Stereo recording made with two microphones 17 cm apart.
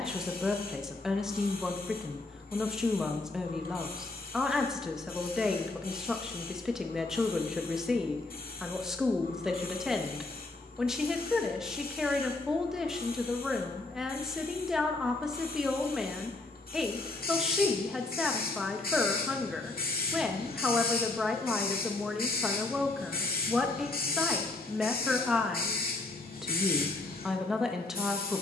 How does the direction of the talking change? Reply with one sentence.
In this clip you hear the talking stay in one place.